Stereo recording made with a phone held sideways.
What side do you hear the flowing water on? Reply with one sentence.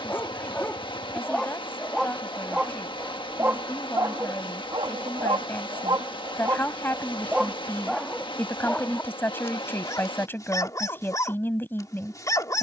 You can hear the flowing water on the left.